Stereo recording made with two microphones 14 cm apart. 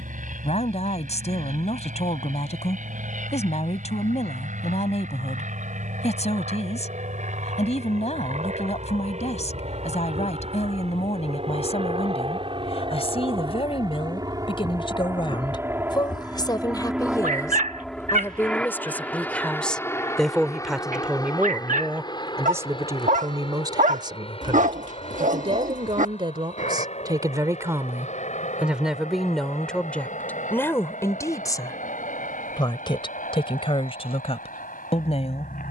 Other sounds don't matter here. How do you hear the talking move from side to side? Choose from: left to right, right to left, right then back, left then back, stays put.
right then back.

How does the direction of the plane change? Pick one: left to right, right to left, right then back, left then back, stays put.
right to left.